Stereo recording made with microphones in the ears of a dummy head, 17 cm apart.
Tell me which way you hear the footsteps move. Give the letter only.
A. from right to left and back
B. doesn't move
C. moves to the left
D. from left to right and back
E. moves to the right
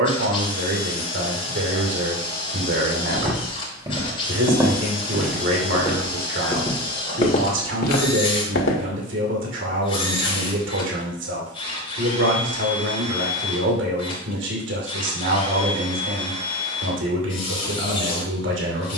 C.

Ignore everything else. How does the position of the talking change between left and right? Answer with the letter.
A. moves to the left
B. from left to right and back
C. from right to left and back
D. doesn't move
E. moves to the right
D.